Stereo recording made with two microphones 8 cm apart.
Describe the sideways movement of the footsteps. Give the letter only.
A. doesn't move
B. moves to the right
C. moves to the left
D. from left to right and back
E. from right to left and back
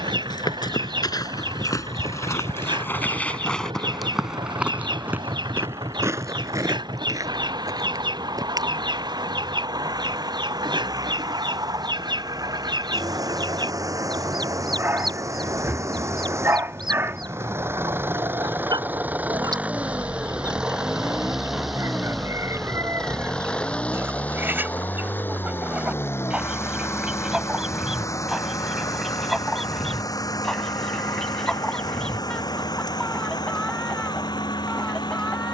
B.